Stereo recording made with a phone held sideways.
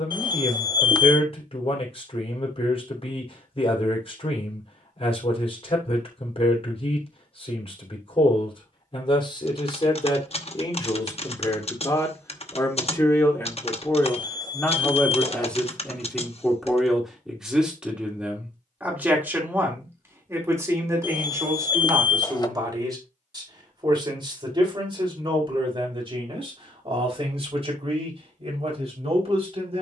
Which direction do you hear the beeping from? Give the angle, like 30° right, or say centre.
30° left.